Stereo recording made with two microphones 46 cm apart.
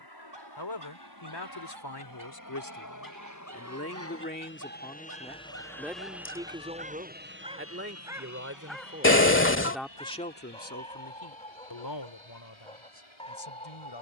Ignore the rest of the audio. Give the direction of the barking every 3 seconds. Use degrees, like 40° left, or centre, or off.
60° right, 40° right, 10° right, 10° left, 10° left.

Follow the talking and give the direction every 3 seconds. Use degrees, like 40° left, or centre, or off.
50° left, 20° left, 20° right, 20° left, 70° left.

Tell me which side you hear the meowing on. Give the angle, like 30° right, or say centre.
30° left.